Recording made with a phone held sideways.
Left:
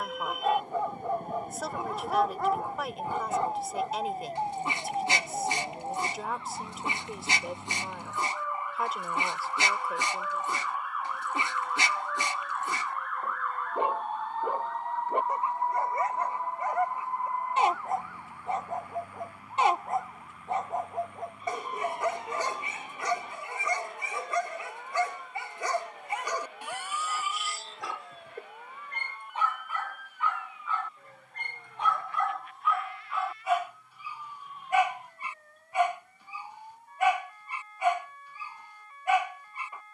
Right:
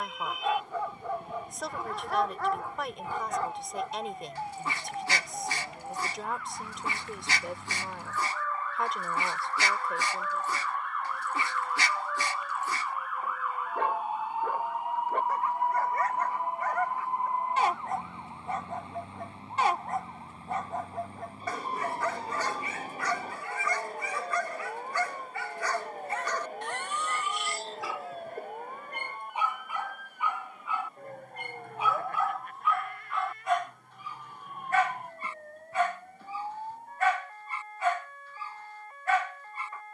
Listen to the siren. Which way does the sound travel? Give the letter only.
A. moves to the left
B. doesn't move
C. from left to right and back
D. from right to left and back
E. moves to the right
E.